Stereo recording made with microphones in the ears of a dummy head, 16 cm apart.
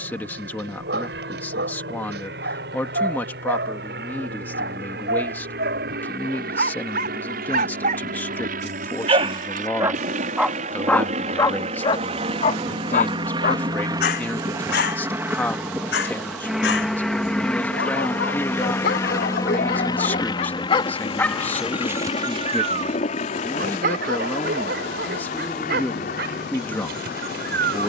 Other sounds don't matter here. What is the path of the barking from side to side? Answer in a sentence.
In this clip you hear the barking move from right to left and back again.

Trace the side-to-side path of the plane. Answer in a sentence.
You can hear the plane go from the right side to the left.